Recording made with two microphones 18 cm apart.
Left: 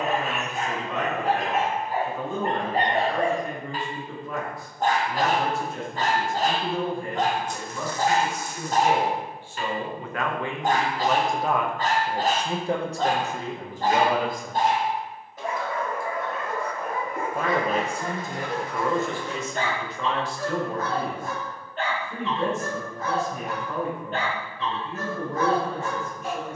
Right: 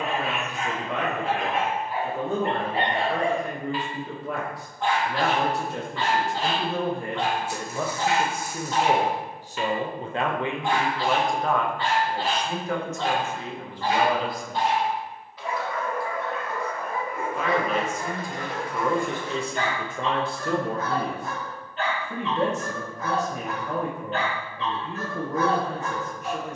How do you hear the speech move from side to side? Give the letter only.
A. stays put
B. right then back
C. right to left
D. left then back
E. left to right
D.